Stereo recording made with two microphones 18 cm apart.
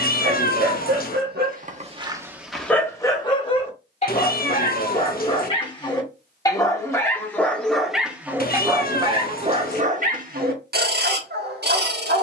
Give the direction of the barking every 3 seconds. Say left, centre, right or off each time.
right, left, centre, right.